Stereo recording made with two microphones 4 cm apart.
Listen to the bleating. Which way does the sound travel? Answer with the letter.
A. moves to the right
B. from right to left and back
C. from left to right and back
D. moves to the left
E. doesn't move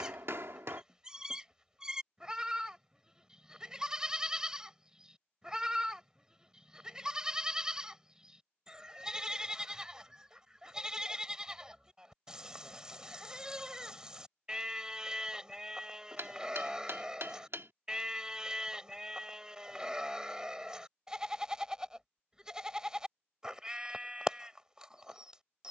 E.